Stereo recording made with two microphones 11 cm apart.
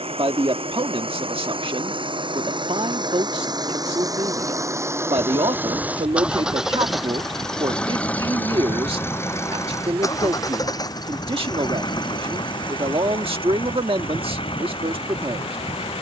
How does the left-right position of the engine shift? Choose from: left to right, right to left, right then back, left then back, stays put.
right to left.